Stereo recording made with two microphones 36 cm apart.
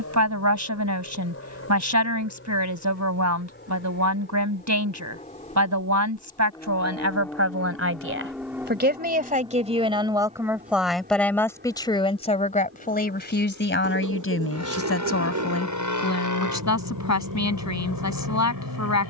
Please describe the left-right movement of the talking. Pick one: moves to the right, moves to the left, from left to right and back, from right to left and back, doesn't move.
moves to the left.